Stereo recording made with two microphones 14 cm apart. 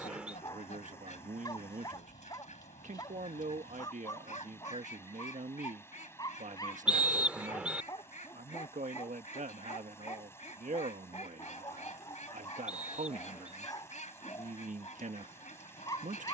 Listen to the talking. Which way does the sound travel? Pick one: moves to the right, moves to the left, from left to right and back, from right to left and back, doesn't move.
doesn't move.